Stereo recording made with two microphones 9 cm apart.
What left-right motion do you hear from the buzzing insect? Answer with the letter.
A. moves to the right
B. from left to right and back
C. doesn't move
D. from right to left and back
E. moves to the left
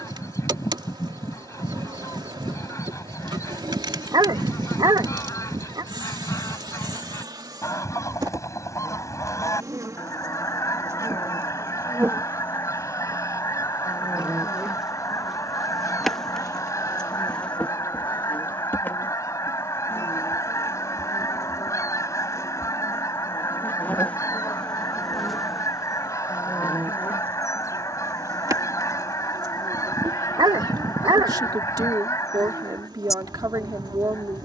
D.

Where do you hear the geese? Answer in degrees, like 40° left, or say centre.
40° left.